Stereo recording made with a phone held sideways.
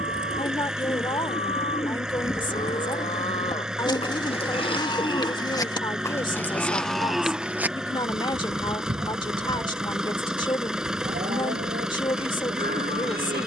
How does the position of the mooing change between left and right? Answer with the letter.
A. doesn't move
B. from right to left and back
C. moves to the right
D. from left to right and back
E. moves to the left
C.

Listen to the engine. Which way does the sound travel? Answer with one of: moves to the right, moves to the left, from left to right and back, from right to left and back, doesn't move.
doesn't move.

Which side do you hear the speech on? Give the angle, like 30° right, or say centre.
30° left.